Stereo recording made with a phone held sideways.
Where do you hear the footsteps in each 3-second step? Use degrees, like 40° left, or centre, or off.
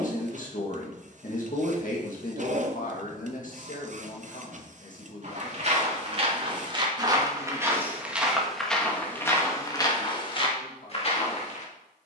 off, 40° right, 20° right, 30° left.